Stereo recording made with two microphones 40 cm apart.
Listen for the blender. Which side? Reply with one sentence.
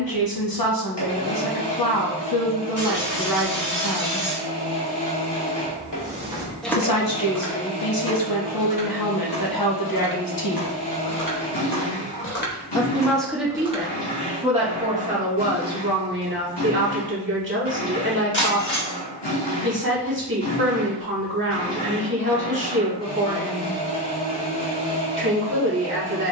You can hear the blender on the left.